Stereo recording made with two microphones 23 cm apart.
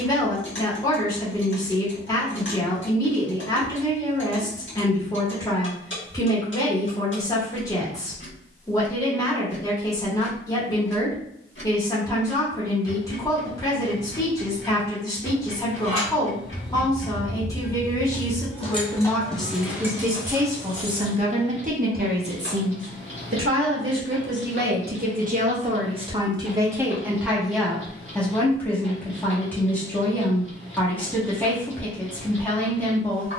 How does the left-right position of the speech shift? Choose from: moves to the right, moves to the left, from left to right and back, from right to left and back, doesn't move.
from left to right and back.